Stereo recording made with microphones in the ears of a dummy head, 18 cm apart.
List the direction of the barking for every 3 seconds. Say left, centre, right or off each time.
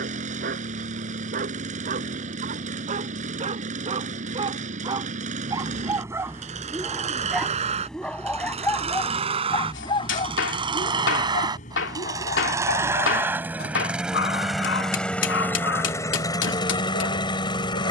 right, right, centre, left, left, left.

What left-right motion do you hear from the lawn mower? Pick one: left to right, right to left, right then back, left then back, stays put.
right to left.